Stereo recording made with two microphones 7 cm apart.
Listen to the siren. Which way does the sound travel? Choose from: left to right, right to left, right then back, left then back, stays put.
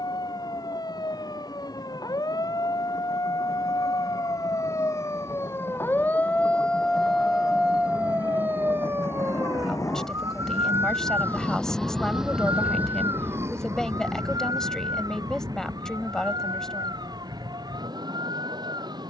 left to right.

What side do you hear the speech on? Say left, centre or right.
centre.